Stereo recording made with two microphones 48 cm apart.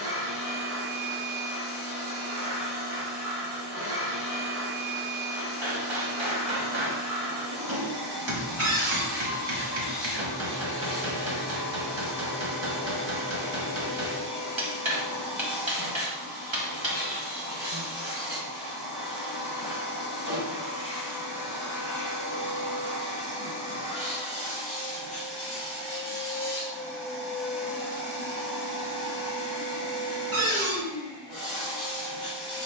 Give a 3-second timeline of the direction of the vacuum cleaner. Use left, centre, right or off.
left, left, left, left, left, left, left, left, centre, centre, centre.